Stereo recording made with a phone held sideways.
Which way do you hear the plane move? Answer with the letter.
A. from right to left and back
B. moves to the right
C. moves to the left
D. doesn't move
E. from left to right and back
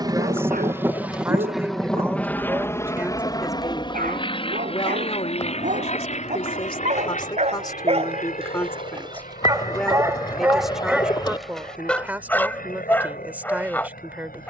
C.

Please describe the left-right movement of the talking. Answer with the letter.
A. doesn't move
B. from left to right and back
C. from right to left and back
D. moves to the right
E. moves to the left
C.